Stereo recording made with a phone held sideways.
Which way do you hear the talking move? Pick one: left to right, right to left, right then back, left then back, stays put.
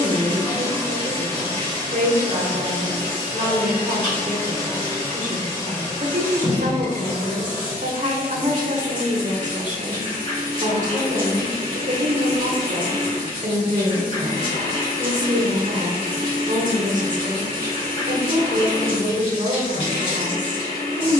stays put.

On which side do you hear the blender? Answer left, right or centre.
left.